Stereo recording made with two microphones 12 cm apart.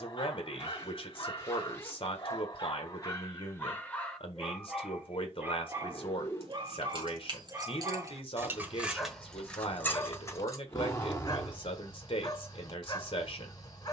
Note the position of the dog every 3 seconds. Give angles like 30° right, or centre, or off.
40° left, centre, 20° right, 20° left, 30° left.